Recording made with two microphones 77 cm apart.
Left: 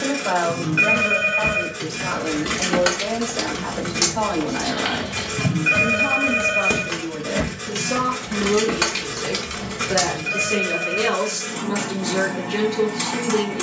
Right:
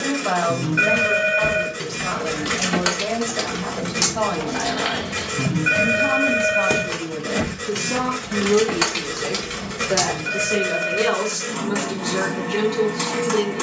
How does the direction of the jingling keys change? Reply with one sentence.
You can hear the jingling keys go left and come back.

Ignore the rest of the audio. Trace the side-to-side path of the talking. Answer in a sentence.
In this clip you hear the talking move from right to left.